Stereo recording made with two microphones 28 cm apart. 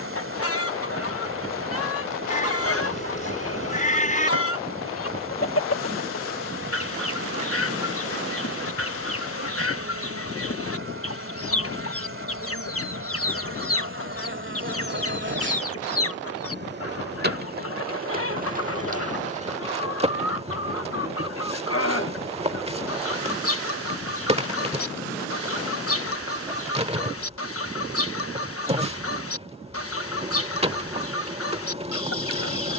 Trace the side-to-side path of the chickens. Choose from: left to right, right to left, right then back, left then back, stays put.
stays put.